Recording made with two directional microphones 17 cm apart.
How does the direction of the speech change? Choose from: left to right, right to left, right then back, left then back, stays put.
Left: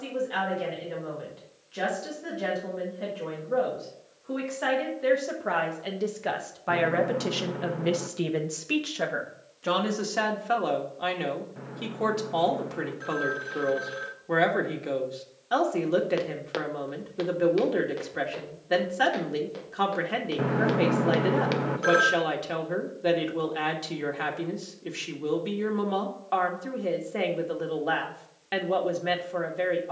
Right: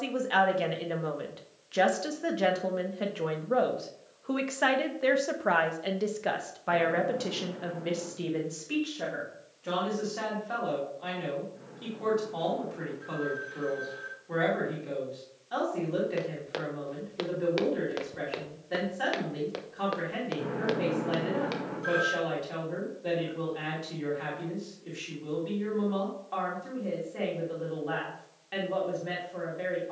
right to left.